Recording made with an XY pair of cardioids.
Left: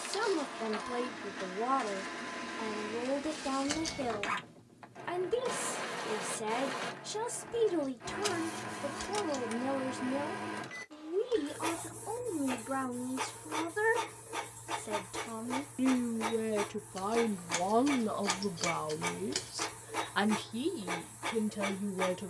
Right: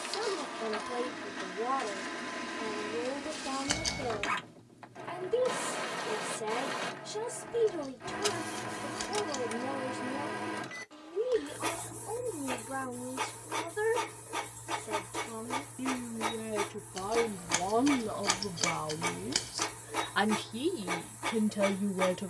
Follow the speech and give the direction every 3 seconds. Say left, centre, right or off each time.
left, left, left, left, left, left, centre, right.